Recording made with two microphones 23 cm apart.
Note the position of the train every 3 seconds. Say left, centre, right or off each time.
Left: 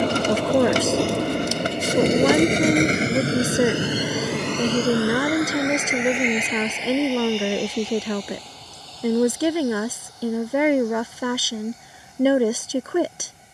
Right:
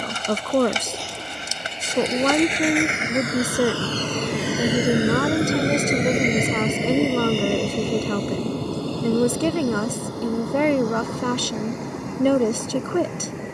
left, centre, right, right, right.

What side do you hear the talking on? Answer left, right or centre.
centre.